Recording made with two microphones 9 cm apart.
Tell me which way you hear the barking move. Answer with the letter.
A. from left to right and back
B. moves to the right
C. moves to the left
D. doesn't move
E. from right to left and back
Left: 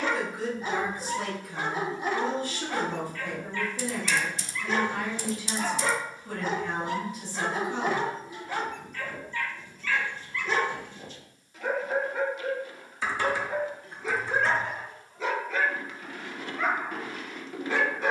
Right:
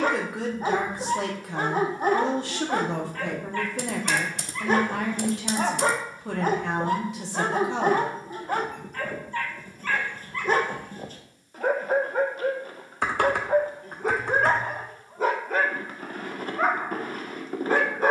D.